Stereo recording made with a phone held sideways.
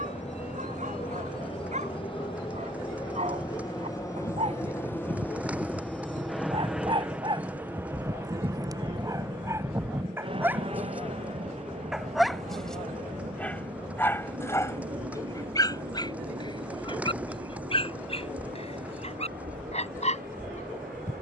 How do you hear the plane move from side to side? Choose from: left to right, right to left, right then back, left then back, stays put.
left to right.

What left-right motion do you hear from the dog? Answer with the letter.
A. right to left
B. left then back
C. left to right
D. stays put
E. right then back
A.